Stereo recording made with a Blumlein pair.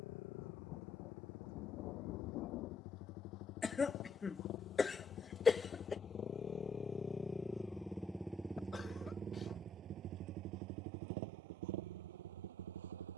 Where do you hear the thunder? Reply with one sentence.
In this clip you hear the thunder on the left.